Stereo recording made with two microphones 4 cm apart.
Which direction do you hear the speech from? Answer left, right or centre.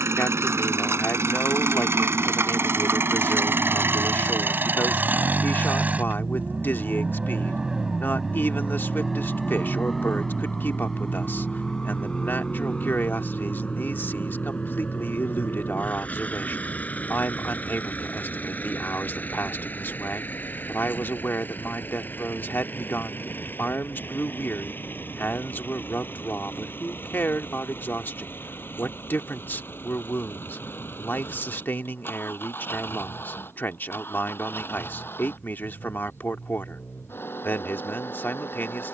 left.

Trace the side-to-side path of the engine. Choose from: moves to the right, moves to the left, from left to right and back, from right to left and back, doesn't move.
moves to the left.